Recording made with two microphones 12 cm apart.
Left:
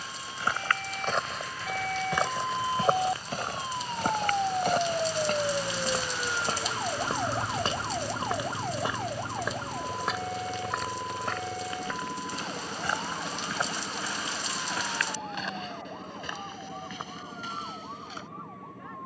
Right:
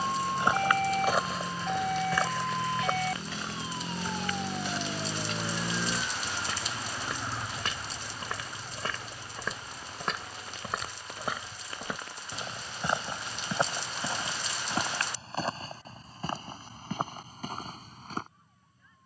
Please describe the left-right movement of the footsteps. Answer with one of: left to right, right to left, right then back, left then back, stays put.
left then back.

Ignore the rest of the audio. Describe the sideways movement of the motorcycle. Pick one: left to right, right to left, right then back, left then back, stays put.
right to left.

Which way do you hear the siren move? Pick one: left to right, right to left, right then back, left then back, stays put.
right to left.